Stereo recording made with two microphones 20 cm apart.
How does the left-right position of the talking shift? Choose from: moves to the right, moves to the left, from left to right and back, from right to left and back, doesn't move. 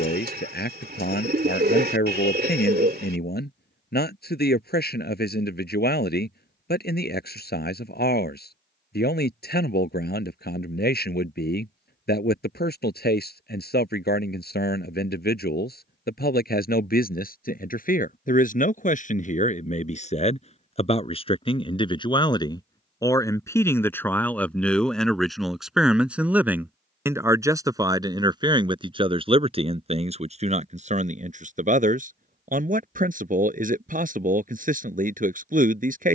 moves to the right.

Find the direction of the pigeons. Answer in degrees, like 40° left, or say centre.
50° right.